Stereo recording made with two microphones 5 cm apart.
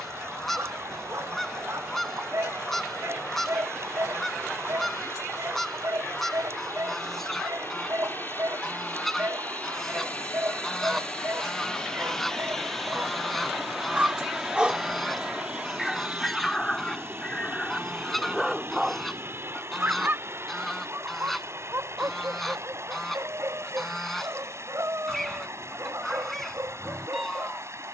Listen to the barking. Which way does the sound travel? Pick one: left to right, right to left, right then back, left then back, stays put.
left then back.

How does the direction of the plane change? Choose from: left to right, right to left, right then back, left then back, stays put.
left to right.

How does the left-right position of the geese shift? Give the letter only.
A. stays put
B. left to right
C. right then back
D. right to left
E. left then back
A.